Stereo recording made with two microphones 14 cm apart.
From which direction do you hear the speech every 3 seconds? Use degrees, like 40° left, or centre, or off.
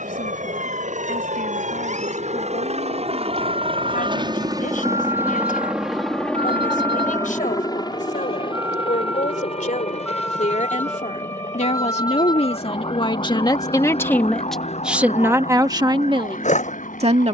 80° left, 80° left, 70° left, 60° left, 30° left, 30° right.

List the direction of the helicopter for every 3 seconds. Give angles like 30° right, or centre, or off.
60° right, 30° right, 20° left, 50° left, 60° left, 60° left.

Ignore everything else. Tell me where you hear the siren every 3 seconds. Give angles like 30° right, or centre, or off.
70° right, 50° right, 30° right, 10° left, 40° left, 60° left.